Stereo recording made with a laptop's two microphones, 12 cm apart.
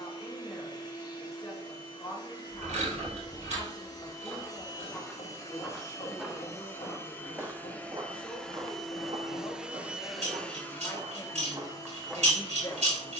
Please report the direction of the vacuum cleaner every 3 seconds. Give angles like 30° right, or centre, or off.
30° left, 30° left, 10° left, 10° left, 30° left.